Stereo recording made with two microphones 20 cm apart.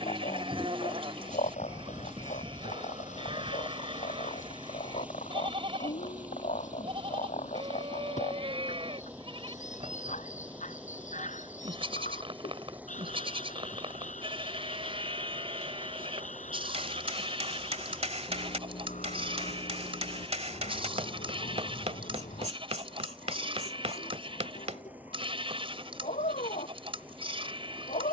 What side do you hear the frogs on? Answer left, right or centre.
left.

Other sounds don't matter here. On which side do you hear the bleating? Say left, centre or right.
right.